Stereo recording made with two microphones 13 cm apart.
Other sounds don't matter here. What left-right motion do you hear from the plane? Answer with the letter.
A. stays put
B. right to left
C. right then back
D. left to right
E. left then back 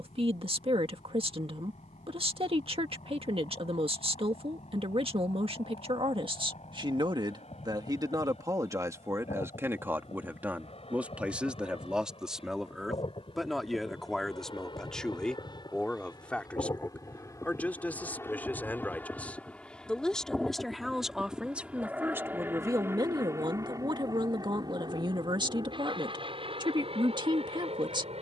D.